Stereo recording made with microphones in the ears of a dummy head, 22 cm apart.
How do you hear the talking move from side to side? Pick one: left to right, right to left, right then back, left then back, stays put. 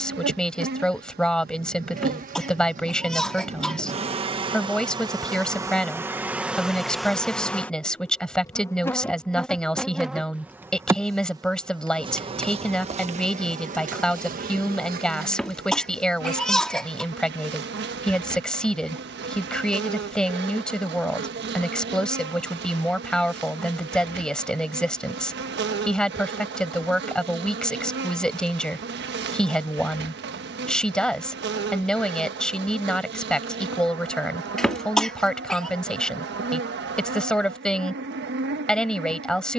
stays put.